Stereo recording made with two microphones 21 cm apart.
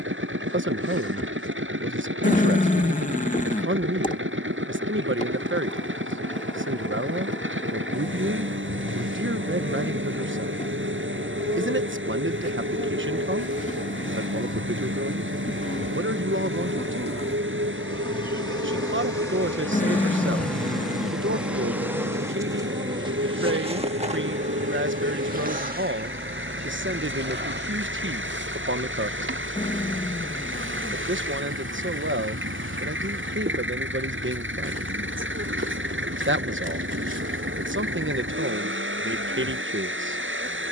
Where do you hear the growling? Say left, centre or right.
left.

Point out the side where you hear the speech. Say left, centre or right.
right.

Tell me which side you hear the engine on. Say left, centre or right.
right.